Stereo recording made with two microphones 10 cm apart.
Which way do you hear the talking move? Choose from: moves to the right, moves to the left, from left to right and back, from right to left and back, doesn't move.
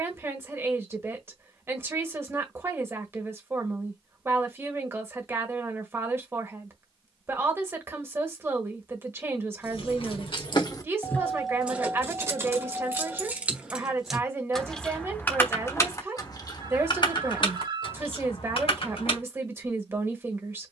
doesn't move.